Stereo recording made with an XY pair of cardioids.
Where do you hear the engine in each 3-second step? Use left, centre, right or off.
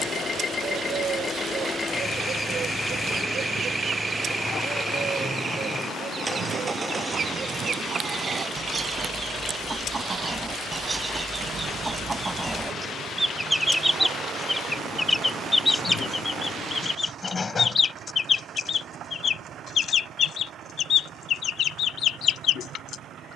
left, centre, right, right, right, right, right, right.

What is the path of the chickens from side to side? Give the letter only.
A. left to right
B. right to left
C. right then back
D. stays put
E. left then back
B.